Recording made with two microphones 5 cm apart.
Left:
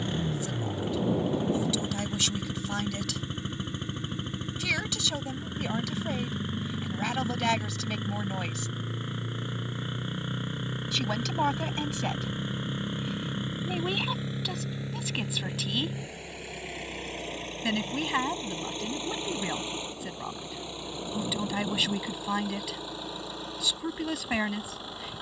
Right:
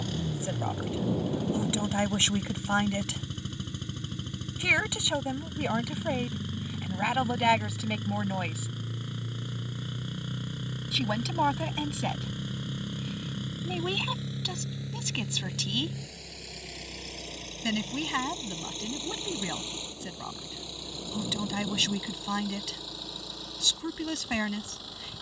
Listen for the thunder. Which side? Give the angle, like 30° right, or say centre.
20° left.